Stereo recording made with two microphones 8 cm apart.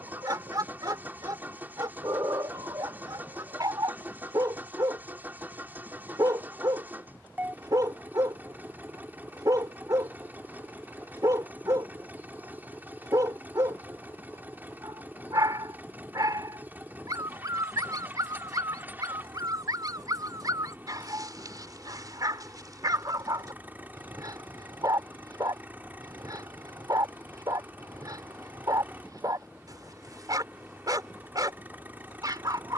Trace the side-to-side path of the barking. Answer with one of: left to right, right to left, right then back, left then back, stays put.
stays put.